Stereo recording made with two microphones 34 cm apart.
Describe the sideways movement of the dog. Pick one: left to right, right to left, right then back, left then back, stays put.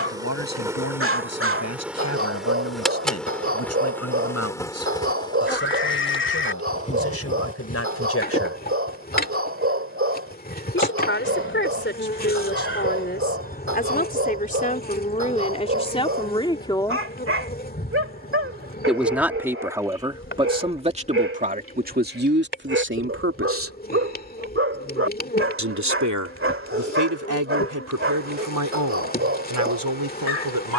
stays put.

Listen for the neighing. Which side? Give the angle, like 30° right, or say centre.
30° left.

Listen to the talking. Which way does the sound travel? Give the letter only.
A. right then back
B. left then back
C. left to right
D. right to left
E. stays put
C.